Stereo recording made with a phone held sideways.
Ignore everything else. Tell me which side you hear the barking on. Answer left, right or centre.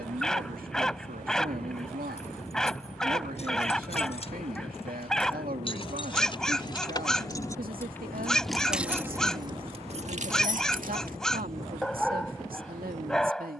centre.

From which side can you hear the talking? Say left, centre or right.
right.